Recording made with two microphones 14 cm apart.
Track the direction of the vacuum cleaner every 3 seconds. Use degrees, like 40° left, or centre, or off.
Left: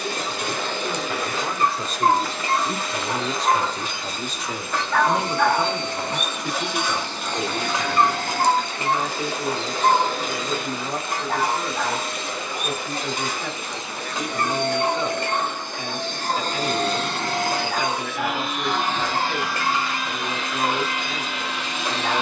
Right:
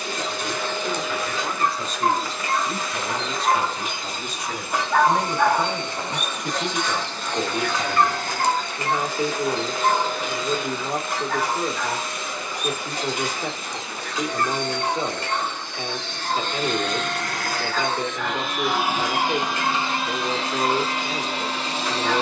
70° left, 70° left, 70° left, 70° left, 60° left, 40° left, 20° right, 30° right.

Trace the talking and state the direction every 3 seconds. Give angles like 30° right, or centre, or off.
50° left, 30° left, 10° right, 30° right, 30° right, 30° right, 30° right, 30° right.